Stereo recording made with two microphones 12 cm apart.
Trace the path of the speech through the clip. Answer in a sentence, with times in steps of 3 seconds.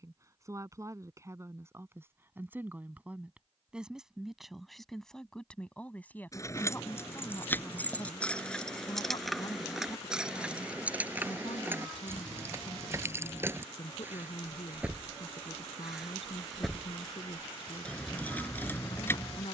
You can hear the speech on the right from 0 s, in the centre from 3 s and on the left from 6 s.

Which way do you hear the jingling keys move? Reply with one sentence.
In this clip you hear the jingling keys move from left to right and back again.